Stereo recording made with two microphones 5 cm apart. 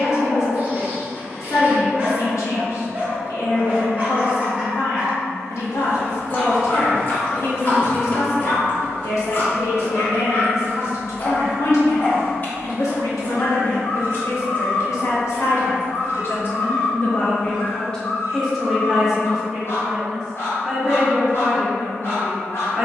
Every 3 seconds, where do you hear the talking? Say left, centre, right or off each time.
left, left, left, left, left, left, centre, centre.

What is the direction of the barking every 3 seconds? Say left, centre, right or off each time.
right, right, left, left, left, left, left, left.